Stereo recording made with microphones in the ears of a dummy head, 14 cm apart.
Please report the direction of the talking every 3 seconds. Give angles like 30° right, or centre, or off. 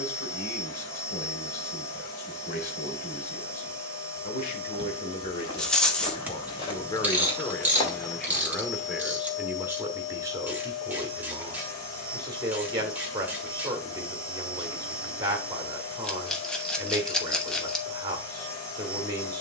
60° left, 50° left, 20° left, 20° right, 20° right, 20° right, 20° right.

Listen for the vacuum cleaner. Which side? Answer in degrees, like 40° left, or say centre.
20° left.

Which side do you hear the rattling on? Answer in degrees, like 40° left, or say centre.
10° left.